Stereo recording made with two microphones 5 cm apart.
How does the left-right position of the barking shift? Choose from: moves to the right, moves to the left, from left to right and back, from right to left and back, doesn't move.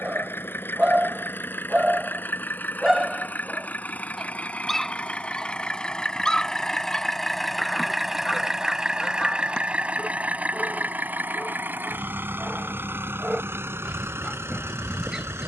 from right to left and back.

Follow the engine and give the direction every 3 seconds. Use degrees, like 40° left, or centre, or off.
50° left, 30° left, centre, 30° right, 50° right.